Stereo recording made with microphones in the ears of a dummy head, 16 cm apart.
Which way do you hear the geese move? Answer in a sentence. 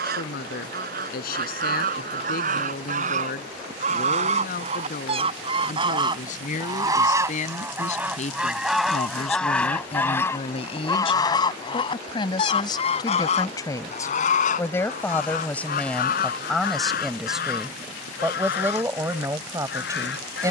You can hear the geese go from the right side to the left.